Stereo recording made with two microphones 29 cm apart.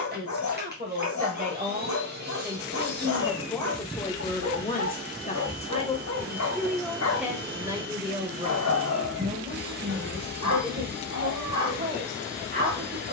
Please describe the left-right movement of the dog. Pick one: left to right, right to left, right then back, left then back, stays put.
stays put.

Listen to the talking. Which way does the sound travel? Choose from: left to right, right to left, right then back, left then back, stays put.
left then back.